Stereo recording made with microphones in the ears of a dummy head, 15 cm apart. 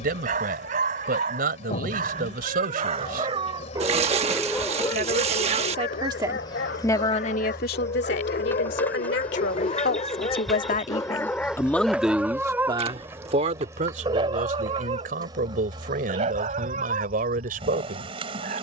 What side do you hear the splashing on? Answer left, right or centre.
right.